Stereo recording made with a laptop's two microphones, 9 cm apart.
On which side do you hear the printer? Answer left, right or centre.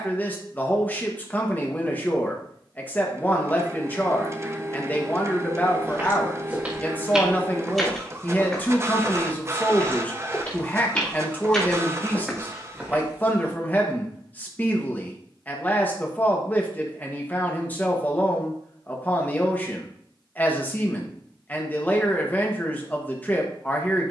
right.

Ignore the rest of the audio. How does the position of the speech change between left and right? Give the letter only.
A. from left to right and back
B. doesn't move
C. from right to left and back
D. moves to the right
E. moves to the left
B.